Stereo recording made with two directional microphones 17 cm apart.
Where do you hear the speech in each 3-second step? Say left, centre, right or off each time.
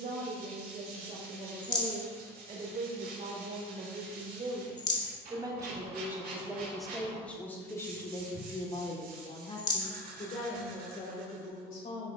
right, right, centre, left.